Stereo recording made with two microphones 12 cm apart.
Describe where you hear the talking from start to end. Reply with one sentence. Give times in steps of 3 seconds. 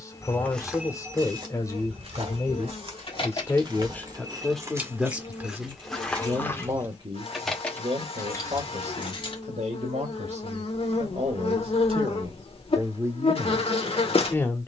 You can hear the talking on the left from 0 s, in the centre from 3 s, on the right from 6 s and in the centre from 12 s.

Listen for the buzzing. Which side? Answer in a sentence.
You can hear the buzzing on the left.